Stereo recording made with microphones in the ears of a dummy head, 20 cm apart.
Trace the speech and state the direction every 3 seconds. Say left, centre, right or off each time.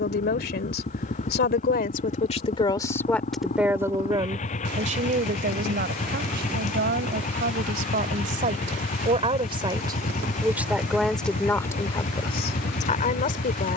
left, right, right, centre, left.